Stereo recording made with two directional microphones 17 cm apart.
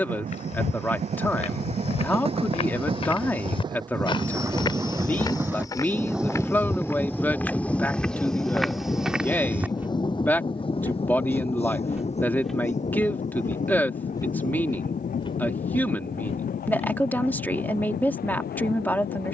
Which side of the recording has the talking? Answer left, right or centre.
centre.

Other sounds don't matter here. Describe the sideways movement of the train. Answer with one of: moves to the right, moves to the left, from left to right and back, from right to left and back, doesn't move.
moves to the left.